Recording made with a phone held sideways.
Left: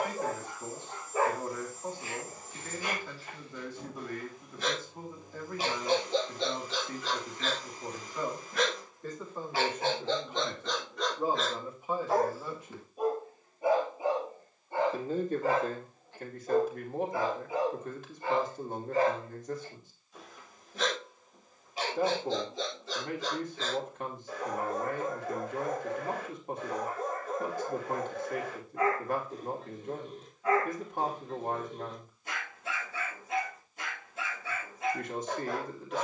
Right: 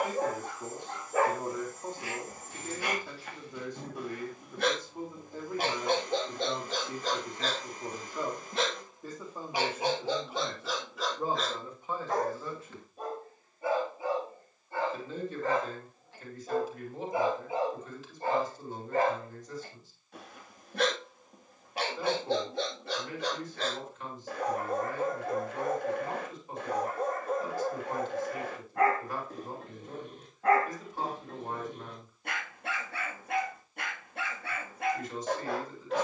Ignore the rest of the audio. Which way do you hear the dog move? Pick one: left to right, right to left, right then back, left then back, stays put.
left then back.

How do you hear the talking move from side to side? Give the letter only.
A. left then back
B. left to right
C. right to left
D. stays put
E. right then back
C.